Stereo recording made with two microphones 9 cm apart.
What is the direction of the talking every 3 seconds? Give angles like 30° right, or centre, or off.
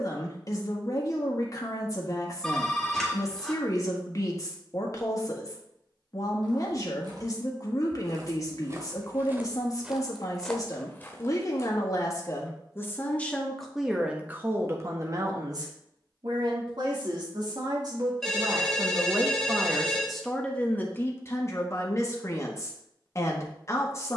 40° left, 40° left, 40° left, 40° left, centre, 50° right, 10° right, 30° left.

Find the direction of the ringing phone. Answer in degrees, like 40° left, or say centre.
centre.